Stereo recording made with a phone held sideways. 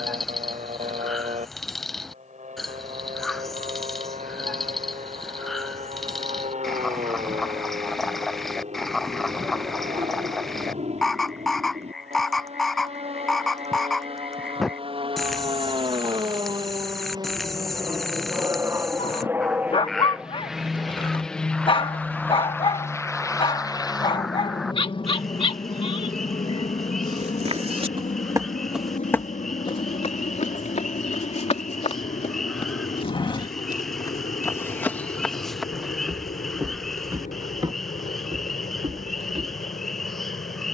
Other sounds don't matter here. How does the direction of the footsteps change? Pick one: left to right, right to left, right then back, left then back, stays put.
left then back.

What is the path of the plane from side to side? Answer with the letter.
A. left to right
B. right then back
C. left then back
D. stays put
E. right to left
E.